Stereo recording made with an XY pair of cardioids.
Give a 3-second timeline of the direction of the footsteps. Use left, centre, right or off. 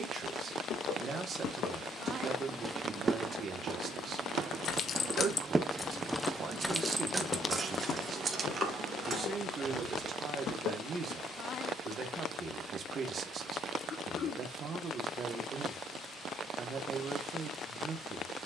left, right, left, left, off, off.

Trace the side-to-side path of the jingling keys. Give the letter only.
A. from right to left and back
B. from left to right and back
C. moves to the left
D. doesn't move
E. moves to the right
E.